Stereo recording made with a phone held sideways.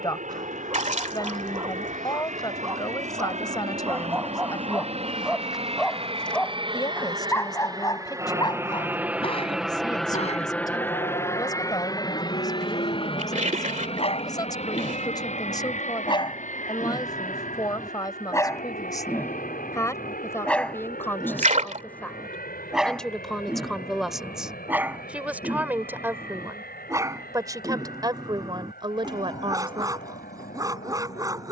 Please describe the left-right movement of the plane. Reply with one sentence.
In this clip you hear the plane move from right to left.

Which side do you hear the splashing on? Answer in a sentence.
In this clip you hear the splashing on the right.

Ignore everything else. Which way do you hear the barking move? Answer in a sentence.
In this clip you hear the barking go left and come back.